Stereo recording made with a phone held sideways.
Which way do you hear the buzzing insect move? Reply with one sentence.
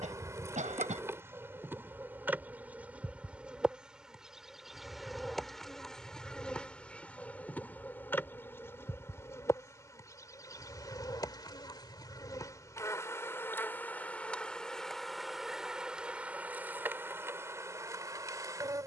You can hear the buzzing insect move from right to left and back again.